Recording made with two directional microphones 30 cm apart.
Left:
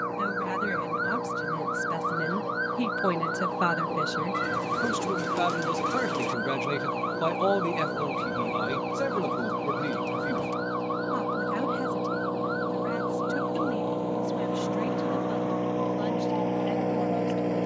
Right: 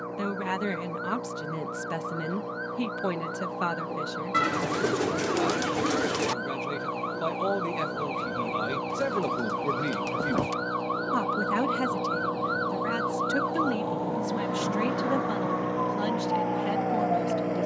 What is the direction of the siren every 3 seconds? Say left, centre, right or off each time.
left, left, centre, right, right, right.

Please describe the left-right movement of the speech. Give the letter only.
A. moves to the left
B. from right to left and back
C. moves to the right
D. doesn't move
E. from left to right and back
B.